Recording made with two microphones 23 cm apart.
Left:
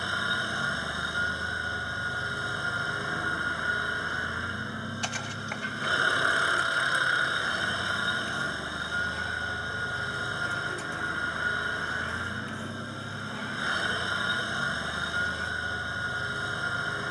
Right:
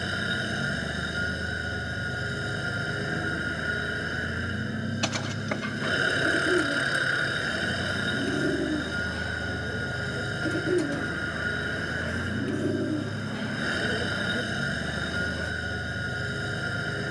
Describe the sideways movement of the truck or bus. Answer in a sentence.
In this clip you hear the truck or bus stay put.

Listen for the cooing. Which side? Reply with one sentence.
In this clip you hear the cooing on the right.